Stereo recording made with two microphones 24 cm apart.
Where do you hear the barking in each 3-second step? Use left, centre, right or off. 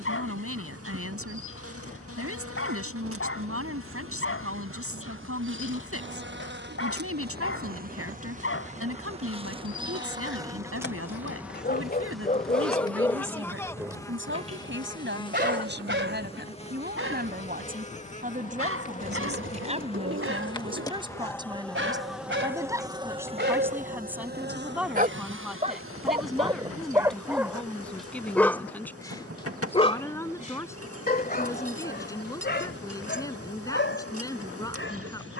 left, left, left, left, centre, right, right, right, right, centre, left, left.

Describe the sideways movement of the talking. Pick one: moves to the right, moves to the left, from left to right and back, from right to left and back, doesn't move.
moves to the left.